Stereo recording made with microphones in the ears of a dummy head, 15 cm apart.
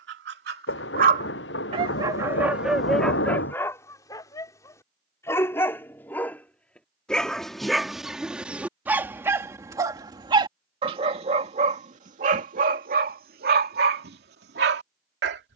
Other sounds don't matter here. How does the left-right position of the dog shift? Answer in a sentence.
In this clip you hear the dog go left and come back.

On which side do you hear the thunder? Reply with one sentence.
In this clip you hear the thunder on the left.